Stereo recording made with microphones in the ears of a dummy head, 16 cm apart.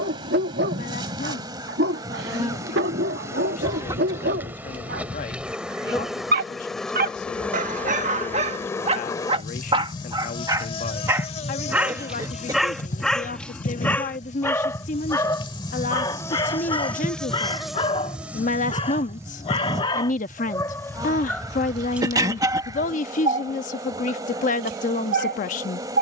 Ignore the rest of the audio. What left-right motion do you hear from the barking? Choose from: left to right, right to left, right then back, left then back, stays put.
left then back.